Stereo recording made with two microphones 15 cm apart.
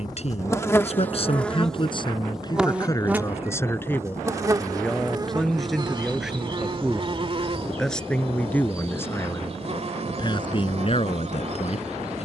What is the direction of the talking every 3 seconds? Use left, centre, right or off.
left, centre, centre, left.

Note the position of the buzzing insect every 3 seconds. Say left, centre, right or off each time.
centre, right, right, right.